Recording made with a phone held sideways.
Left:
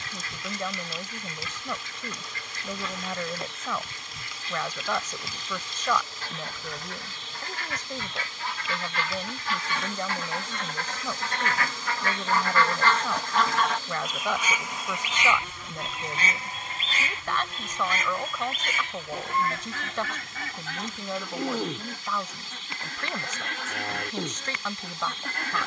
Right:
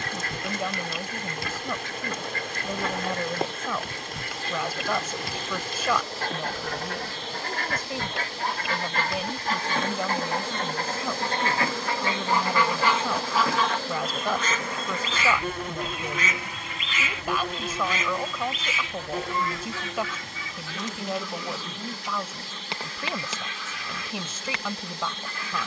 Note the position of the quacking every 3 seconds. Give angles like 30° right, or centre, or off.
70° right, 70° right, 60° right, 40° right, centre, 30° left, 50° left, 60° left, 60° left.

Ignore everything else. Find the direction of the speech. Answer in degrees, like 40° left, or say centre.
10° right.